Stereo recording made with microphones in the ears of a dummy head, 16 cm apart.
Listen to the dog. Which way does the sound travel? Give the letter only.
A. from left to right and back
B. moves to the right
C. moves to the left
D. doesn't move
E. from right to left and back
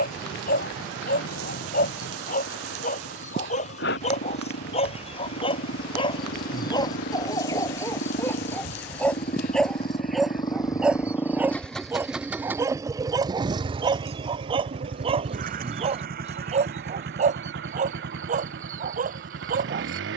B.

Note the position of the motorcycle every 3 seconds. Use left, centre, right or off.
left, left, left, left, right, right, right.